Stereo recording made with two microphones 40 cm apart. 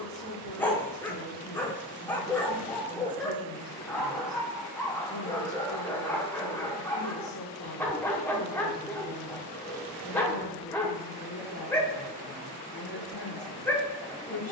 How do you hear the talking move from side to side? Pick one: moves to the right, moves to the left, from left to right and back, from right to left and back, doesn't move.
doesn't move.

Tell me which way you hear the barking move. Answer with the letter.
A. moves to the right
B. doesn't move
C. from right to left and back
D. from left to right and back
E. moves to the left
B.